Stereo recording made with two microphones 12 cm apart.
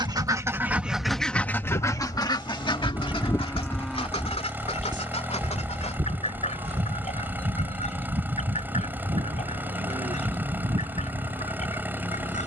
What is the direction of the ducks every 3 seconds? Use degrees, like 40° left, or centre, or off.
10° left, 60° left, 70° left, 70° left.